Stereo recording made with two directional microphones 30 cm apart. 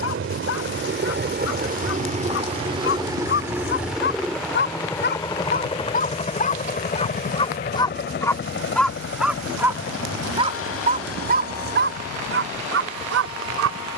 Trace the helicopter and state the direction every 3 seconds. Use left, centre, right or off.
right, centre, left, left, left.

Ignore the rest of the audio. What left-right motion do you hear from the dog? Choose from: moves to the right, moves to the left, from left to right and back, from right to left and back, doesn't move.
moves to the right.